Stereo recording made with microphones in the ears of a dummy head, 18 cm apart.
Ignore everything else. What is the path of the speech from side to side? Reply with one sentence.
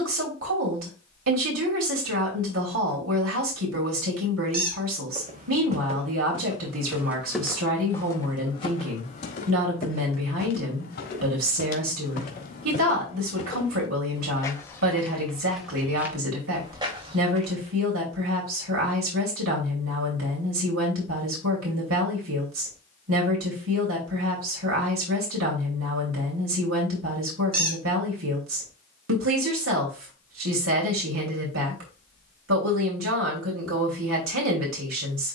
In this clip you hear the speech stay put.